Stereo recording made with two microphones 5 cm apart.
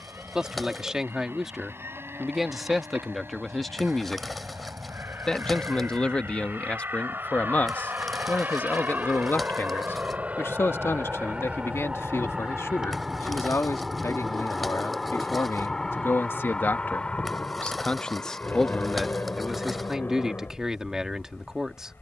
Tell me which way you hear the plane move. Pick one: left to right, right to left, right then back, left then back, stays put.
right to left.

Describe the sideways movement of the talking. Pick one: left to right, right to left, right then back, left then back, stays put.
left then back.